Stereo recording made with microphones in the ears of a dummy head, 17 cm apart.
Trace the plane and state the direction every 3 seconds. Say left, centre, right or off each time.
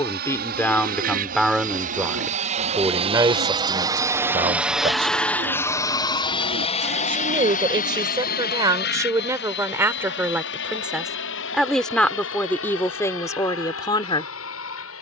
right, centre, left, left, left.